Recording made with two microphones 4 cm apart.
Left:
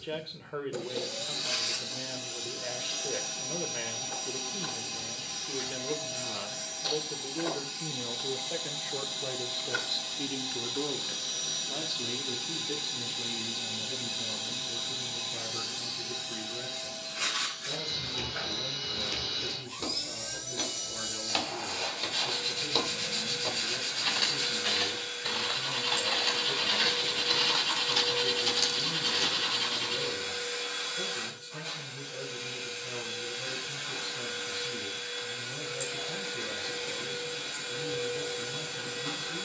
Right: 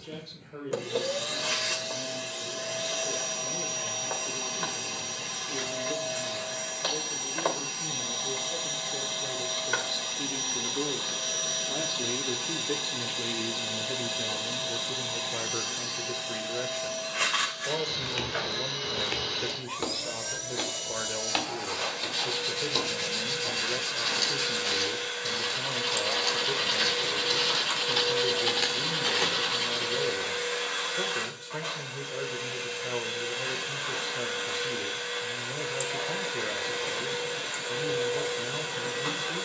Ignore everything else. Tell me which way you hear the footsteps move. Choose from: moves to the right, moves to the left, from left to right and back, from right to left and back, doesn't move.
from right to left and back.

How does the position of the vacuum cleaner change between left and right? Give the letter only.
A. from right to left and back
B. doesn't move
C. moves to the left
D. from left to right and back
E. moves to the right
B.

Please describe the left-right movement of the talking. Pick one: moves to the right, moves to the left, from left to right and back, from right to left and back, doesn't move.
moves to the right.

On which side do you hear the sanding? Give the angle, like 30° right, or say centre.
10° right.